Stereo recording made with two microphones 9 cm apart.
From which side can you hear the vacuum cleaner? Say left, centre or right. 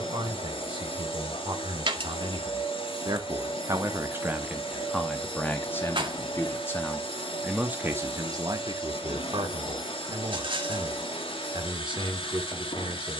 left.